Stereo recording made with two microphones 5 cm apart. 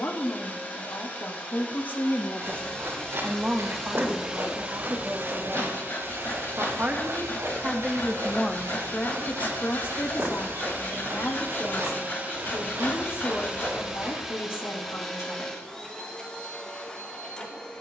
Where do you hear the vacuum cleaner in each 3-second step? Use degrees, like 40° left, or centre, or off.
30° left, 20° right, 70° right, 60° right, 20° right, 20° left.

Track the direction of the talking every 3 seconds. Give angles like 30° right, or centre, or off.
50° left, 50° right, 20° right, 50° left, 60° left, 60° left.